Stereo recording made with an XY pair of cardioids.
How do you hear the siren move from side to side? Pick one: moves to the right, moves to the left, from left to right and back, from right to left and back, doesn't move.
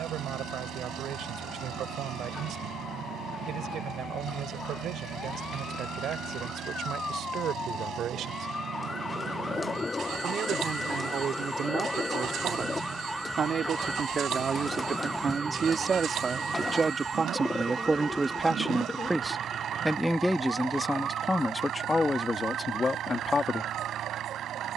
moves to the right.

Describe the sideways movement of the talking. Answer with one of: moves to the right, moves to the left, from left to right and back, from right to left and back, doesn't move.
moves to the left.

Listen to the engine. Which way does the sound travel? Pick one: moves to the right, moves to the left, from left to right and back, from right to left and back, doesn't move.
doesn't move.